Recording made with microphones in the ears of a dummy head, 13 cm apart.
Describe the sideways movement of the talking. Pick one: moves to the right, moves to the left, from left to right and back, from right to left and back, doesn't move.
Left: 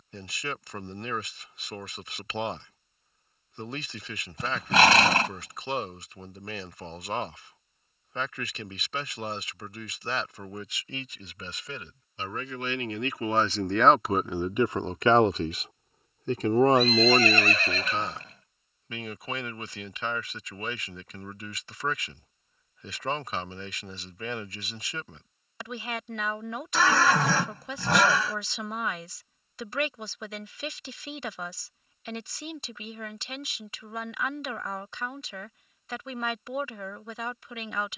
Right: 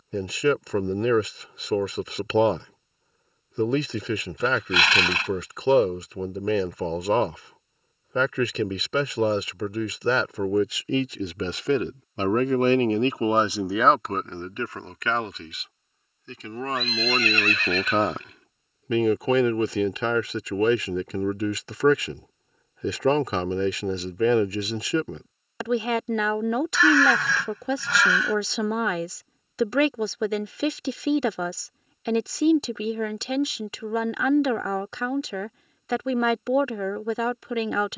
from right to left and back.